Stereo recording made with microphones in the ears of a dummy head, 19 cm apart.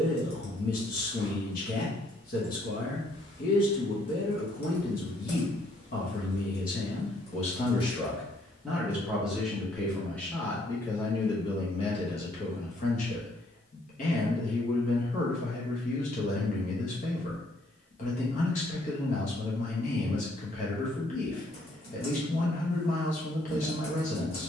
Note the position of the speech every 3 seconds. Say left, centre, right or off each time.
left, left, left, centre, left, left, left, left.